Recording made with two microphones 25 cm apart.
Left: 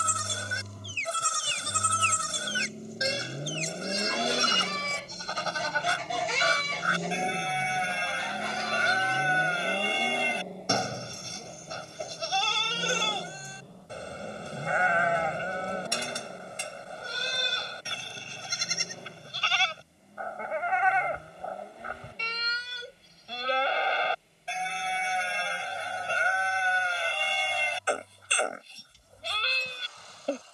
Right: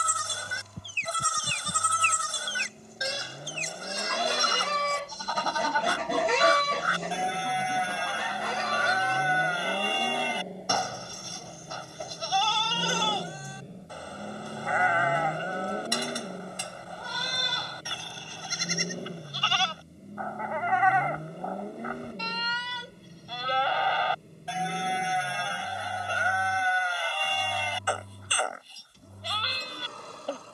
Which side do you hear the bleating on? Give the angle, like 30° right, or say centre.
20° left.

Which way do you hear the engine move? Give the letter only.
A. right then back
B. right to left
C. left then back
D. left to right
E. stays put
D.